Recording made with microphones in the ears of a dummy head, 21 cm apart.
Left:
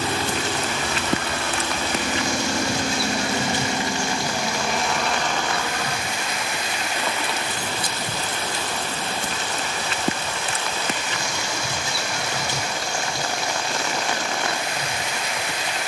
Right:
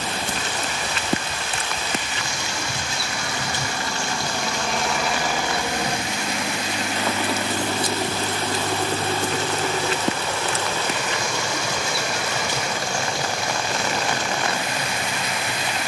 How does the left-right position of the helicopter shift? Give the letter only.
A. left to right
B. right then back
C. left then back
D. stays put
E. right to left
A.